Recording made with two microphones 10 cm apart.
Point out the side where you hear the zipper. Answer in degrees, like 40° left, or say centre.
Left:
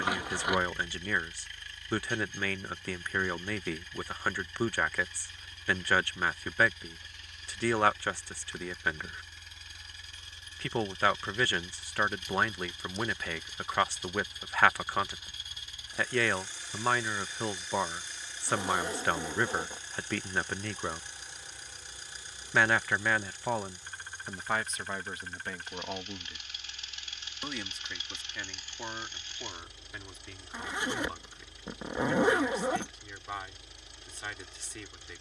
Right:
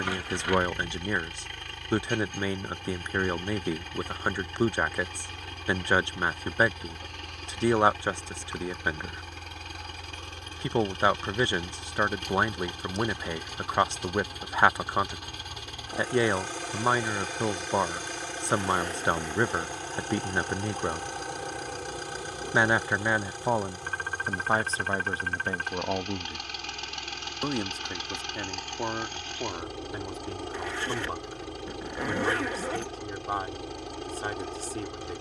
20° left.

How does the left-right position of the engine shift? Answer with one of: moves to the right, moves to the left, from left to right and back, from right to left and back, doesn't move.
doesn't move.